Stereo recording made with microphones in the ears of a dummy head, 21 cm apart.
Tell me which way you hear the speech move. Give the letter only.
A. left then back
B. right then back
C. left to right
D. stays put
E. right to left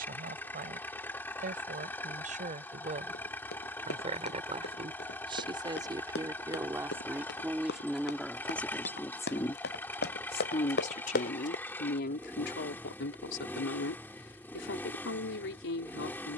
E.